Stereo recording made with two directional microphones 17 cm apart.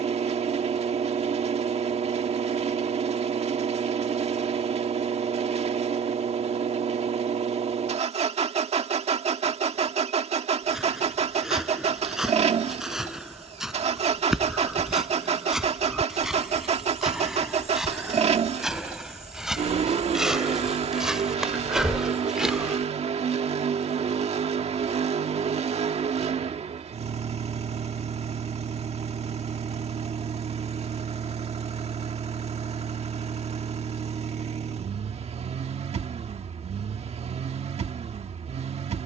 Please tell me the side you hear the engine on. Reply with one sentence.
You can hear the engine on the right.